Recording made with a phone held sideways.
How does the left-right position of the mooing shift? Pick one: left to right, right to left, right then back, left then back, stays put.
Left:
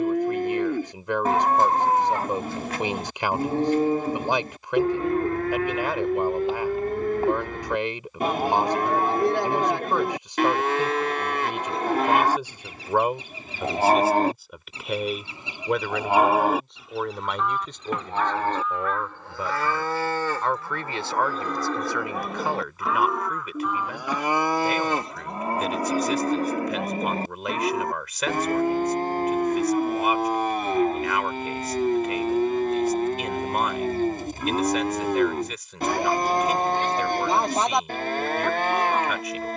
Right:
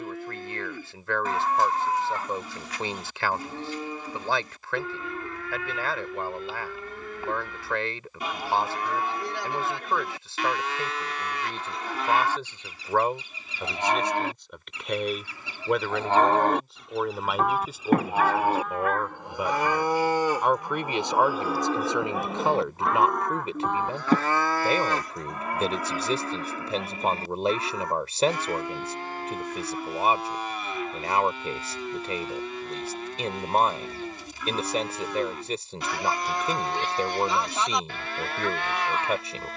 right then back.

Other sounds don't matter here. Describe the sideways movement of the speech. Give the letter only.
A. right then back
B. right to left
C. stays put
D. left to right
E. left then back
D.